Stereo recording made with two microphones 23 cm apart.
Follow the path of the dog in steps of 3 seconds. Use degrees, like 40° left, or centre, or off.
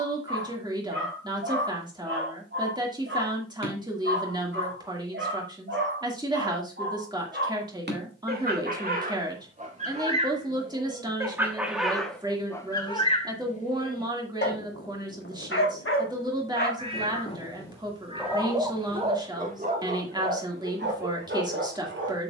50° right, 50° right, 40° right, 20° right, 30° left, 40° left, 30° right, 50° right.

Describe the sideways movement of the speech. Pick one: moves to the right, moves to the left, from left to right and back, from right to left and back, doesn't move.
doesn't move.